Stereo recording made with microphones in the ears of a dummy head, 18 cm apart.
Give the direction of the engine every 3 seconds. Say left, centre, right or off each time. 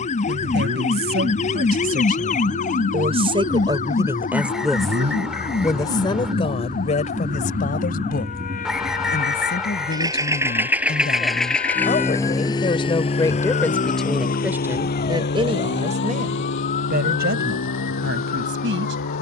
right, right, right, centre, left, left, left.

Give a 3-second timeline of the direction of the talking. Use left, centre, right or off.
right, centre, left, left, centre, right, right.